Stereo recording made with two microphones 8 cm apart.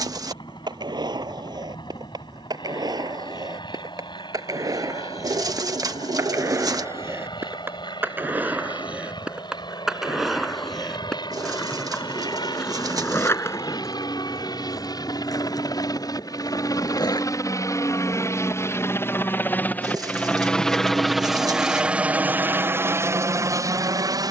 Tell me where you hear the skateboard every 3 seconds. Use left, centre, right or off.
right, right, right, centre, left, left, off, off.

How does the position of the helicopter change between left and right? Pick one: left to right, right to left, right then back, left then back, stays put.
left to right.